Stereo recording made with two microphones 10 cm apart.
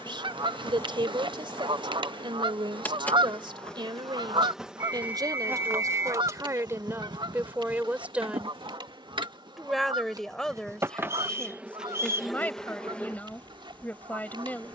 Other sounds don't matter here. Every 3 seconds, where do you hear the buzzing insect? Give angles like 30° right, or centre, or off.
20° left, centre, 50° right, 30° right, 10° left.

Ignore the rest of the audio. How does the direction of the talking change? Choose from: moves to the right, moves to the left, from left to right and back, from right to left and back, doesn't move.
moves to the left.